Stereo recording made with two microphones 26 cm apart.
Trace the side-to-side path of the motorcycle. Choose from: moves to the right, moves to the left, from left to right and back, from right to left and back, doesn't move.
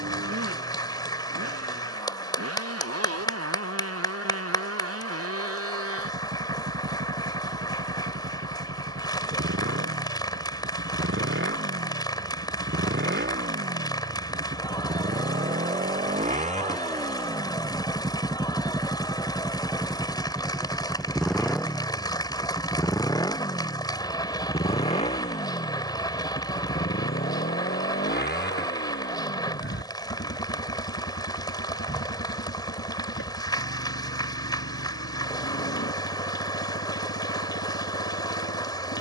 moves to the left.